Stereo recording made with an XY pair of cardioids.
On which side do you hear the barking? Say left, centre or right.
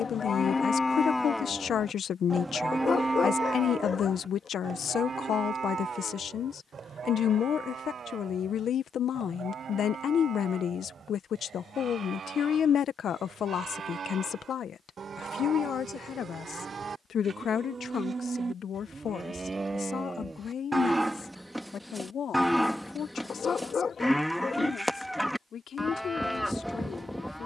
left.